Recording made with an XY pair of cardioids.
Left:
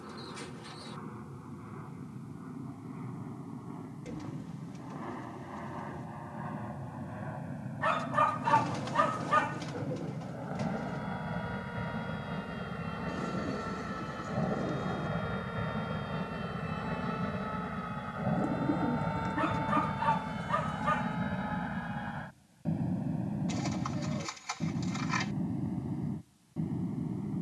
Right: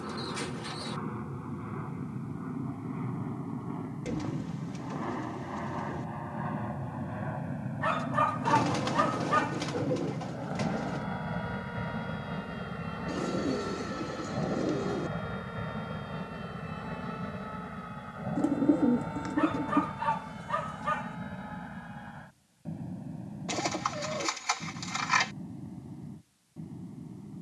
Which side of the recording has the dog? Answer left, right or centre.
centre.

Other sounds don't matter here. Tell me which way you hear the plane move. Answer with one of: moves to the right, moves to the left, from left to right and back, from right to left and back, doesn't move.
moves to the left.